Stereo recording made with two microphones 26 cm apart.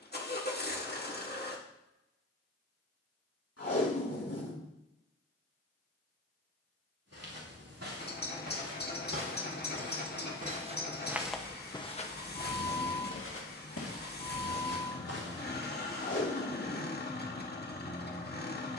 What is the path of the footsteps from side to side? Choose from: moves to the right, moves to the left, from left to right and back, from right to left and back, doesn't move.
moves to the left.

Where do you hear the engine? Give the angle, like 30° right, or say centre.
40° left.